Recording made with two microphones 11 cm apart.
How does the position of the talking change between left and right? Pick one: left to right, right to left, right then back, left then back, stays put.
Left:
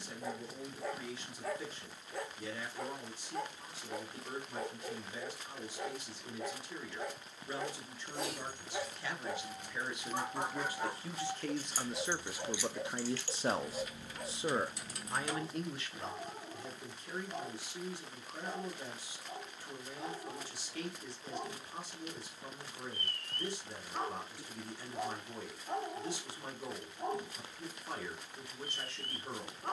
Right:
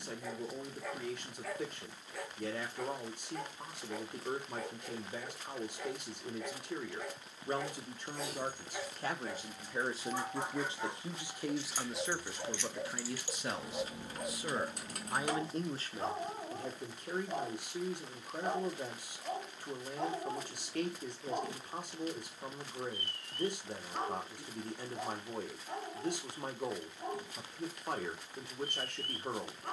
left then back.